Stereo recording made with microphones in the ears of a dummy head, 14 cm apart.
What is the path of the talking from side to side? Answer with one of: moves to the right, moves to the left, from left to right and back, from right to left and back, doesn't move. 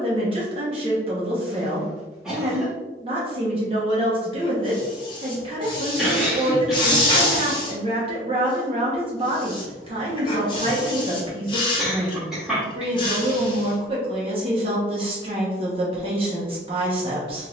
doesn't move.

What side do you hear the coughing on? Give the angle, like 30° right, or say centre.
centre.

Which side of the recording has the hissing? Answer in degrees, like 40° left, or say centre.
30° left.